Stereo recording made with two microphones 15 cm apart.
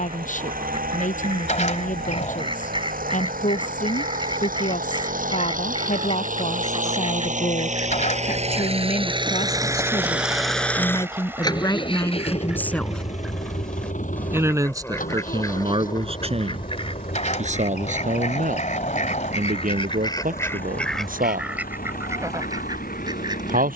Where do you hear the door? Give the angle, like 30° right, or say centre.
50° left.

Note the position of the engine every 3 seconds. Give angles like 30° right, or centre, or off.
80° right, 70° right, 60° right, centre, 50° left, 70° left, 80° left, 80° left.